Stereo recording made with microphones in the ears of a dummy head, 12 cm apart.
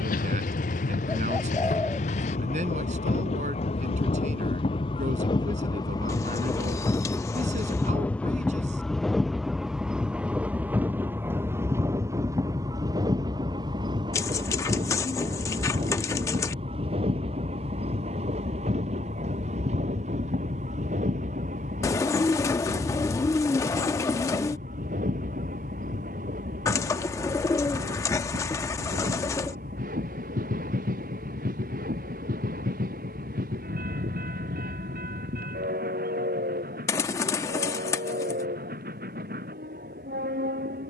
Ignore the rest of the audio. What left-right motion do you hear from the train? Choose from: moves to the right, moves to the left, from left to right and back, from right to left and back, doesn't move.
moves to the right.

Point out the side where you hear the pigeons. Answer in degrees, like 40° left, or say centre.
20° left.